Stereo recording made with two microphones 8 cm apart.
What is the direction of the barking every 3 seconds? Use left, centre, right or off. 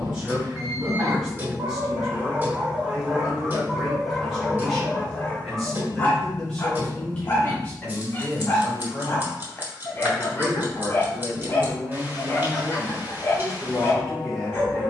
right, centre, left, left, left.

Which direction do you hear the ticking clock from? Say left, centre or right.
right.